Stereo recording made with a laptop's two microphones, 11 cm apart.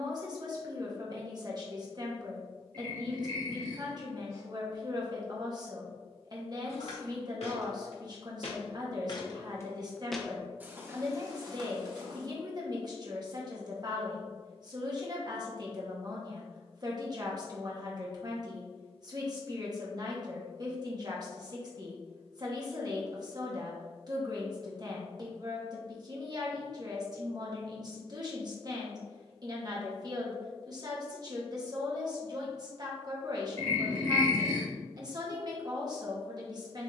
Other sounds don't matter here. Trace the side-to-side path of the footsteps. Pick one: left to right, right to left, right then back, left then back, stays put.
left to right.